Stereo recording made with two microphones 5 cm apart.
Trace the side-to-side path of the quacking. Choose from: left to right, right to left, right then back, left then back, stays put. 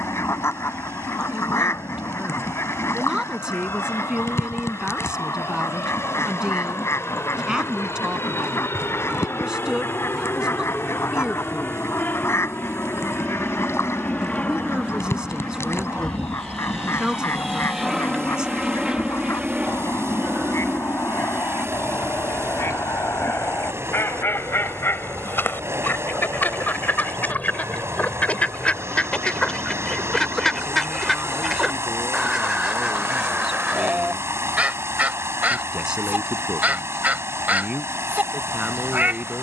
left to right.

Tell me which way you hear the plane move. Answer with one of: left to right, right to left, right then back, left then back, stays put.
left to right.